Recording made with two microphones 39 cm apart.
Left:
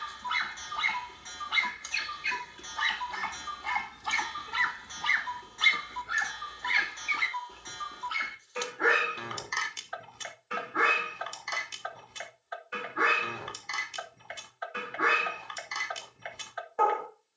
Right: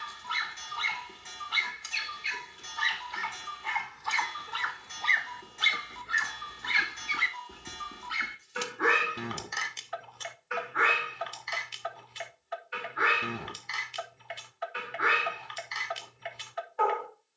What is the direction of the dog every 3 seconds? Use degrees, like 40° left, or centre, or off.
70° left, 40° left, 20° right, 40° left, 60° left, 60° left.